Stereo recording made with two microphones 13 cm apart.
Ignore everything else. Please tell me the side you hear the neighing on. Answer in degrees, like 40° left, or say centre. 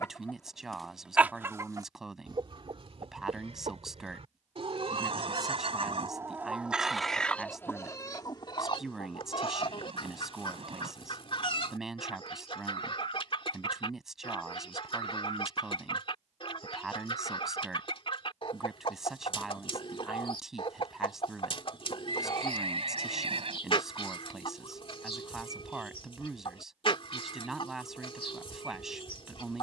50° right.